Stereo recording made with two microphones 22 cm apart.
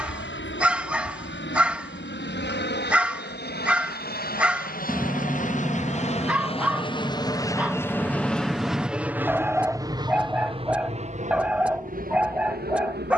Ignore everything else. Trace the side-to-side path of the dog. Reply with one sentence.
In this clip you hear the dog stay in one place.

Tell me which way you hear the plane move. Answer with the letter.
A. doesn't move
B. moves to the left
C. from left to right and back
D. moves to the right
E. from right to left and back
D.